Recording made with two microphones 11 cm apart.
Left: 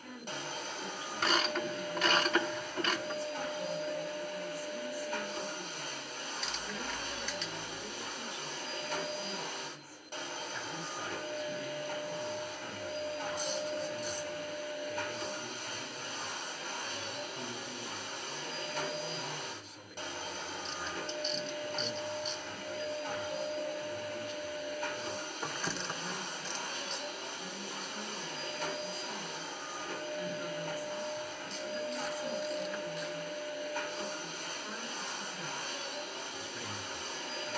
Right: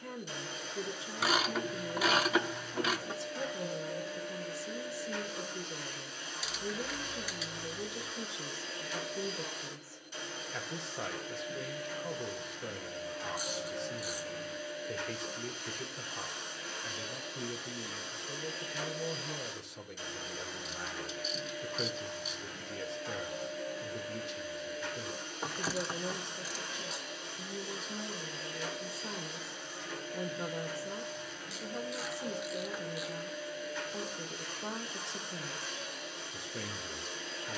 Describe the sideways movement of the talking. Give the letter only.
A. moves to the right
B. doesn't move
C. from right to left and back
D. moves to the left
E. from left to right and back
B.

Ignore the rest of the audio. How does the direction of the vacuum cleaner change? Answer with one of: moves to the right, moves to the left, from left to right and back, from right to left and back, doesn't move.
doesn't move.